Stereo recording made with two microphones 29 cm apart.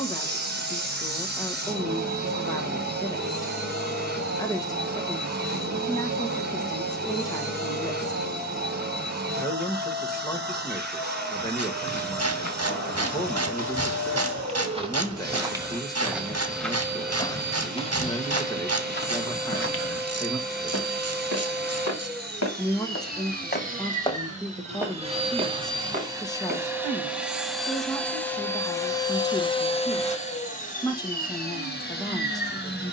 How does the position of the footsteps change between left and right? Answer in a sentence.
You can hear the footsteps move from right to left and back again.